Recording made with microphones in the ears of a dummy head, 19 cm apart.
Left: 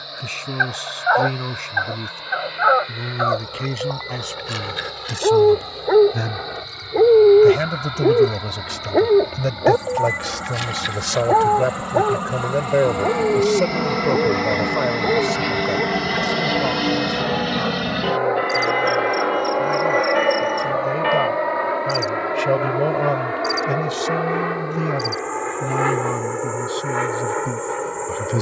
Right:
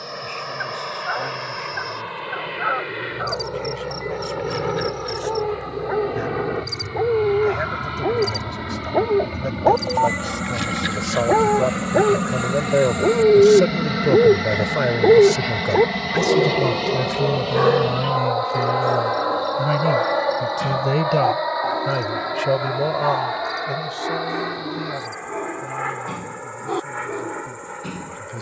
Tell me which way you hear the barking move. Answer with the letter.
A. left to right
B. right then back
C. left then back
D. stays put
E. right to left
A.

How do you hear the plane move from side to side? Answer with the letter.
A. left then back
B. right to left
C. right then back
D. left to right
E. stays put
B.